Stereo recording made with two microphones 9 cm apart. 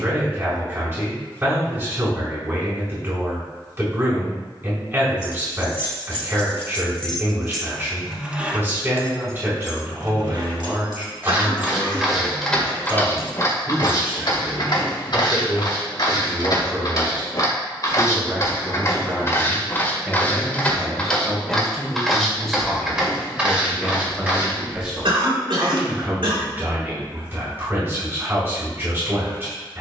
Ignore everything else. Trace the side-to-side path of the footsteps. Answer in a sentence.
You can hear the footsteps go left and come back.